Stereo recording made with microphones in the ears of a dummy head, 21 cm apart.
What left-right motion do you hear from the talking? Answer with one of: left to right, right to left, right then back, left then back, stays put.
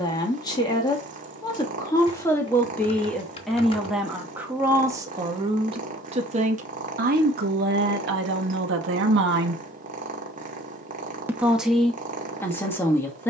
right then back.